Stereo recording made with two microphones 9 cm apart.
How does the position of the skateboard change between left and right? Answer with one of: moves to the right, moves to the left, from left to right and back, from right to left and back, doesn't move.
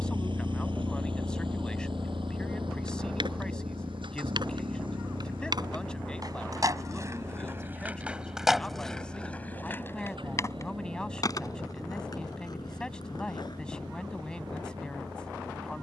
moves to the left.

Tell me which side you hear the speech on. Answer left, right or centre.
centre.